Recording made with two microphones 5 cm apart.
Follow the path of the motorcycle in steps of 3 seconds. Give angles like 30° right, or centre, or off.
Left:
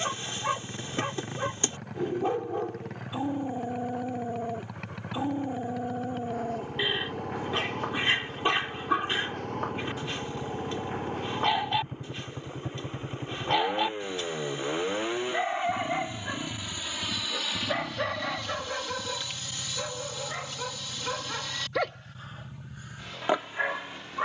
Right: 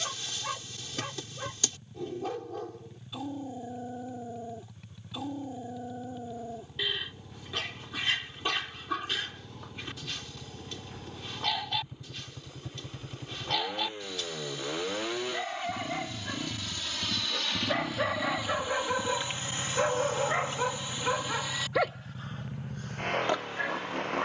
70° left, 70° left, 60° left, 50° left, 30° left, centre, 30° right, 50° right.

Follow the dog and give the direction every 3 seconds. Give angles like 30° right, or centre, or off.
30° left, 30° left, 30° left, 30° left, 30° left, 20° left, 20° right, centre.